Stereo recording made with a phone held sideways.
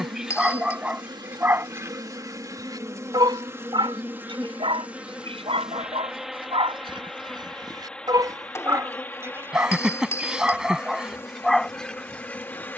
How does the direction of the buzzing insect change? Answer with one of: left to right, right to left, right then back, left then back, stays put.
right to left.